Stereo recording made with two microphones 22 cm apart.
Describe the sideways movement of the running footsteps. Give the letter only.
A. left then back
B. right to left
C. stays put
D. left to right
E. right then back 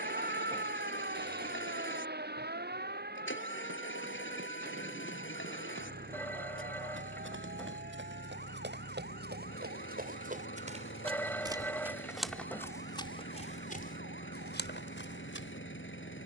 B.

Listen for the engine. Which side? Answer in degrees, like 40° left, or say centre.
60° left.